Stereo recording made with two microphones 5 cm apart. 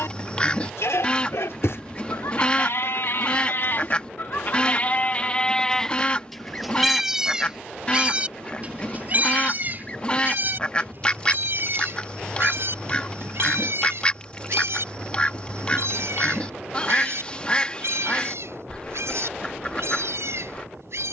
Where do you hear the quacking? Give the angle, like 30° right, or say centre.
20° left.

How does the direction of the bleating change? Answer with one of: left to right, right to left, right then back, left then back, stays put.
left to right.